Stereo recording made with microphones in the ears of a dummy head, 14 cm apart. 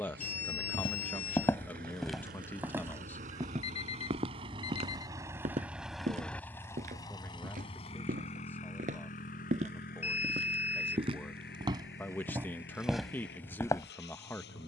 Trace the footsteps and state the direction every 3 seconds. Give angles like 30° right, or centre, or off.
10° left, 40° right, 50° right, 40° right, centre.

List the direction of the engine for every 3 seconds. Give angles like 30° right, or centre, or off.
60° right, 30° right, 30° left, 60° left, 70° left.